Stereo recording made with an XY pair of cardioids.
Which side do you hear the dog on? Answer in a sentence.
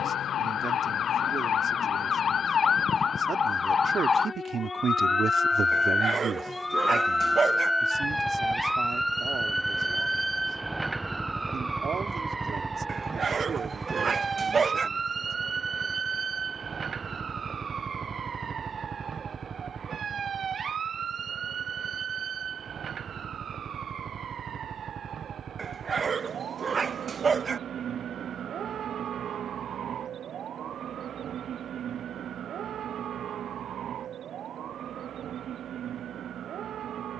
You can hear the dog on the right.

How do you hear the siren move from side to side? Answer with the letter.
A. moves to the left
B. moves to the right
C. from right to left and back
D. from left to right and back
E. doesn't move
B.